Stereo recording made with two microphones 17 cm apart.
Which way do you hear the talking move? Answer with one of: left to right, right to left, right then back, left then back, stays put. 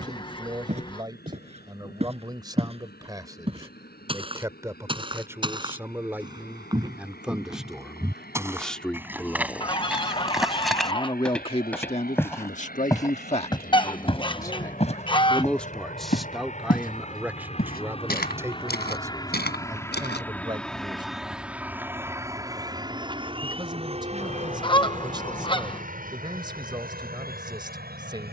left then back.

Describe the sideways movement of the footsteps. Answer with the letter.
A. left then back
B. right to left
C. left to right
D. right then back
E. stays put
B.